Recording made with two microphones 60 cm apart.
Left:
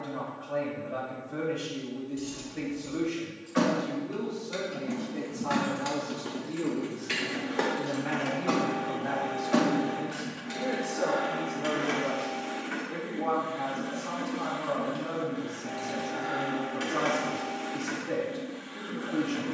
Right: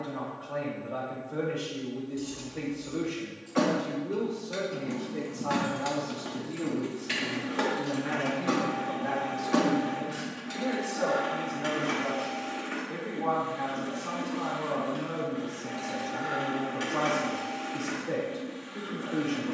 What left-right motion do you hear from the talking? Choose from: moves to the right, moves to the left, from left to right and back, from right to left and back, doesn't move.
from left to right and back.